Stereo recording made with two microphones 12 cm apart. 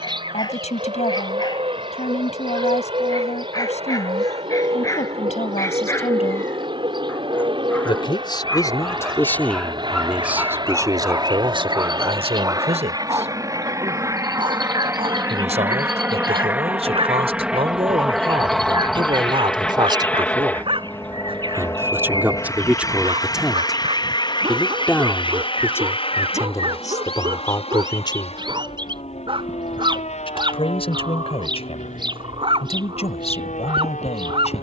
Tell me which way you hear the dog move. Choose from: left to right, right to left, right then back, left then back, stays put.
left to right.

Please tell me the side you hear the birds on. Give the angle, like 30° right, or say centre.
40° right.